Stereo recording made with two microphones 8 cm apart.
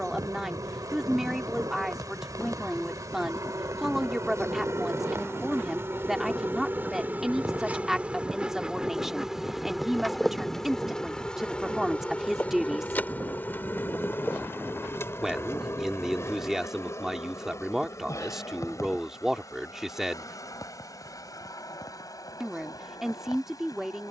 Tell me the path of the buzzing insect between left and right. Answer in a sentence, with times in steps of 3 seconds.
You can hear the buzzing insect on the right from 0 s, in the centre from 9 s and on the left from 12 s.